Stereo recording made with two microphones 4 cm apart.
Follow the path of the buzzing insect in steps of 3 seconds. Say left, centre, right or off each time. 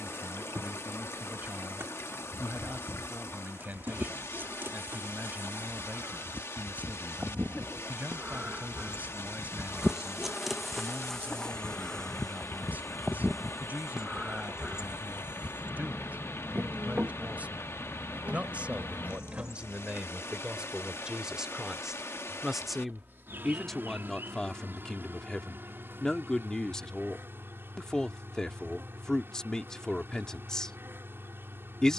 right, right, right, centre, centre, right, right, right, right, right, right.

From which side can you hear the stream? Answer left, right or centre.
left.